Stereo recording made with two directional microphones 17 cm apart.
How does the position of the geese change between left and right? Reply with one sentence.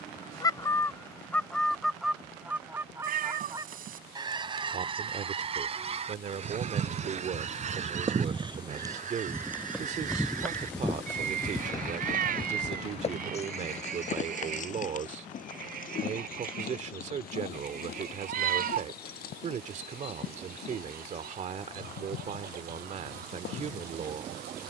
In this clip you hear the geese go from the left side to the right.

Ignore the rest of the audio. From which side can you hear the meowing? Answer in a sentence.
You can hear the meowing on the right.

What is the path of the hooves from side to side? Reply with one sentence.
You can hear the hooves travel towards the left.